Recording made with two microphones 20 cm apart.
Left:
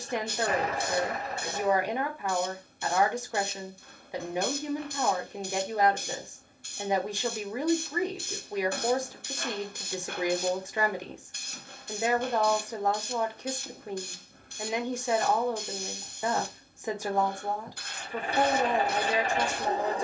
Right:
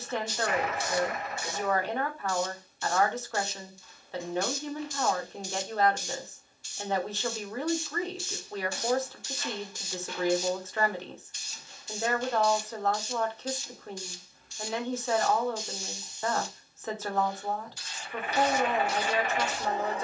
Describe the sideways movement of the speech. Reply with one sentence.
In this clip you hear the speech stay in one place.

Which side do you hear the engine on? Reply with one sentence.
You can hear the engine on the left.